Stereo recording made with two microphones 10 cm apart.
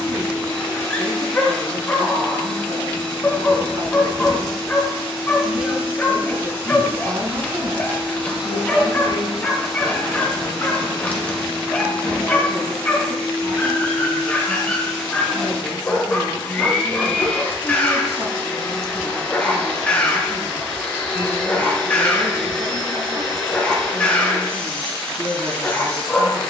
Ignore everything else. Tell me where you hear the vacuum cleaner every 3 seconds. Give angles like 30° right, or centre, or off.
20° left, centre, 20° right, 10° left, 10° left, 10° left, 10° left, 10° left, 10° left.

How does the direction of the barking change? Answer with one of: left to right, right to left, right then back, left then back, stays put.
stays put.